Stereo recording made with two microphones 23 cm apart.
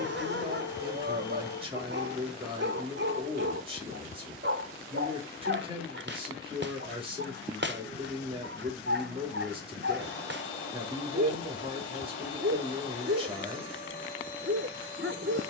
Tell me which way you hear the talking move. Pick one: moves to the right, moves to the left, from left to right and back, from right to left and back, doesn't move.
doesn't move.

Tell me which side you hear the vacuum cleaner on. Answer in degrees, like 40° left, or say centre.
50° left.